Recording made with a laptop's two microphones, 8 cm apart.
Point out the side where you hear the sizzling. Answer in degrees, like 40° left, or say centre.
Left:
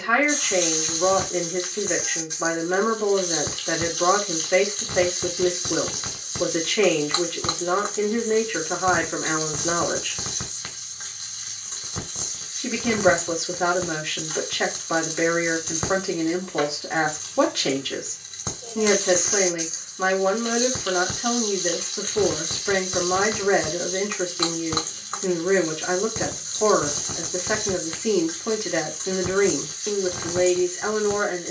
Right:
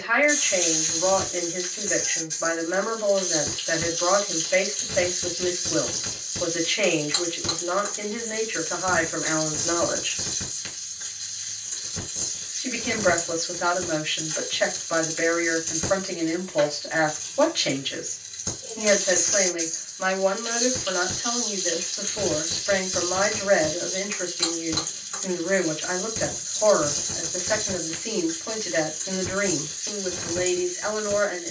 60° left.